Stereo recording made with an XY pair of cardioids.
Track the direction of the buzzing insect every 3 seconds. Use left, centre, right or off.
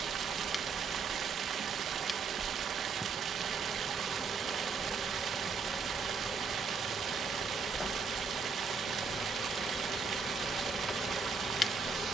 centre, centre, left, left.